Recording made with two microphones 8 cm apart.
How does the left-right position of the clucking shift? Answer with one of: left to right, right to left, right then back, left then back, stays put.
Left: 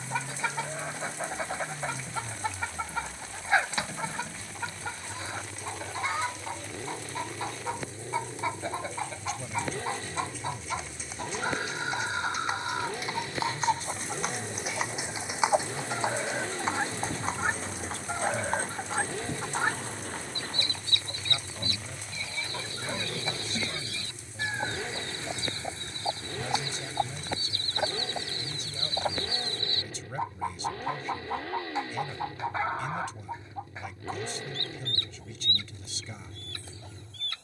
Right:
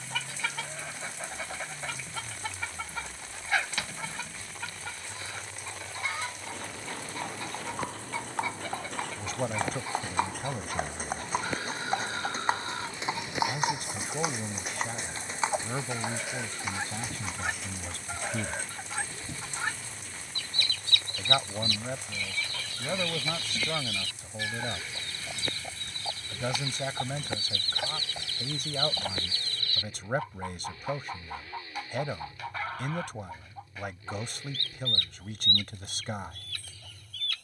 stays put.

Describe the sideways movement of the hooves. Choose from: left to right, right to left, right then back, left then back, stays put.
right to left.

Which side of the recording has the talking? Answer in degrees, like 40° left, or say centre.
60° right.